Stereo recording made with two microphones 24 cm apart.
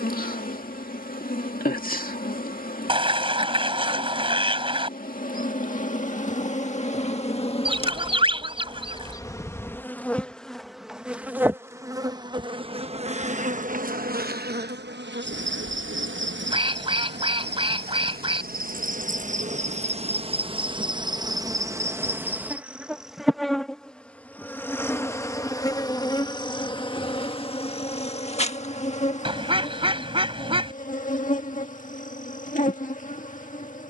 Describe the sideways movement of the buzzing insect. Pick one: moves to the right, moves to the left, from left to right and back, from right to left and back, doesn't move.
from left to right and back.